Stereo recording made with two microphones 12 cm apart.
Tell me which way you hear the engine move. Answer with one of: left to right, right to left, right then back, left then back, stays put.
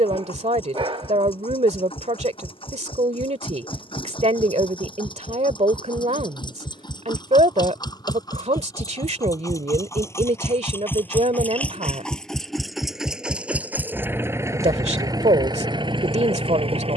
left to right.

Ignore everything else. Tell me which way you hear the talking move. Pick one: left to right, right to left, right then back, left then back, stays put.
stays put.